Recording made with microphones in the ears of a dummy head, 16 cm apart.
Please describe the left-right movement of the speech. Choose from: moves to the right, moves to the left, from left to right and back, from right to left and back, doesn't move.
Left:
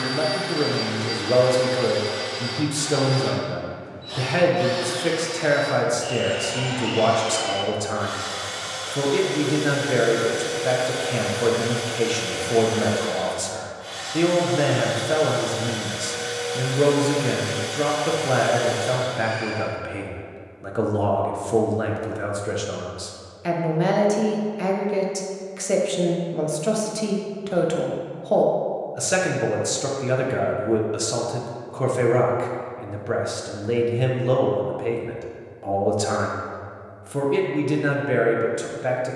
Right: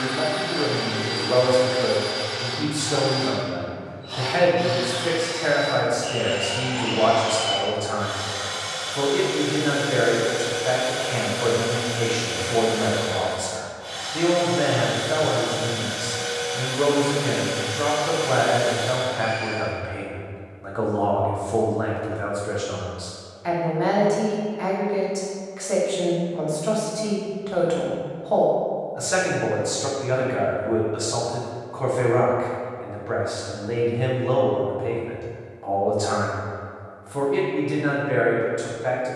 doesn't move.